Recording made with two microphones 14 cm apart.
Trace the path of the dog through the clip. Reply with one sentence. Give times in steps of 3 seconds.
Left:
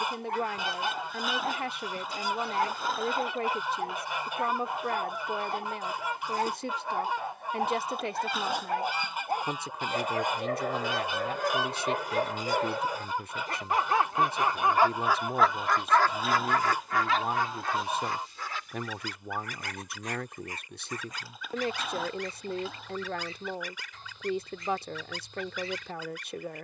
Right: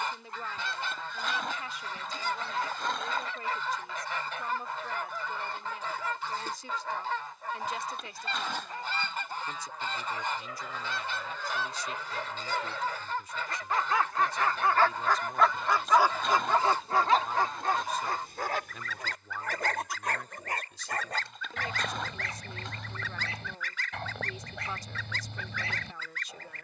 You can hear the dog on the left from 0 s and on the right from 15 s.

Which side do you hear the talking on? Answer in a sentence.
In this clip you hear the talking on the left.